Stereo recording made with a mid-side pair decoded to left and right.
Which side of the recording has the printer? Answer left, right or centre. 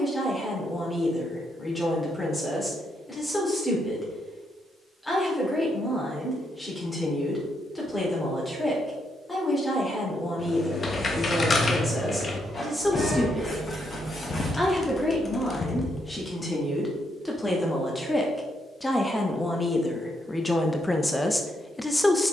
left.